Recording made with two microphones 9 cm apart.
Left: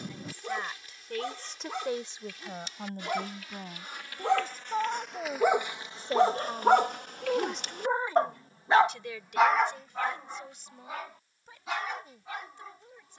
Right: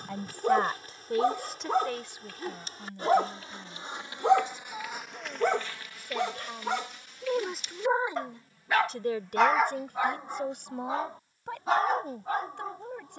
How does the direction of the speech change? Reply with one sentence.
In this clip you hear the speech move from right to left and back again.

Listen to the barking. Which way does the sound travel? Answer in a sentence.
In this clip you hear the barking go left and come back.